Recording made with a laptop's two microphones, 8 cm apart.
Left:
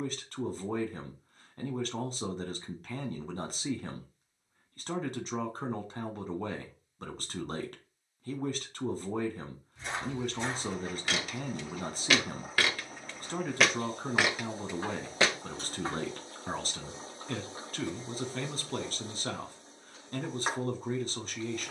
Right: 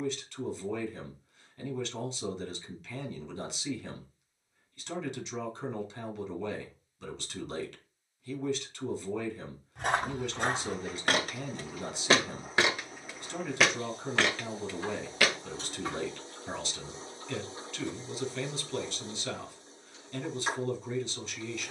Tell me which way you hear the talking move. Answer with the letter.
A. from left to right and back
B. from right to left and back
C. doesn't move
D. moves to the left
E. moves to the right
C.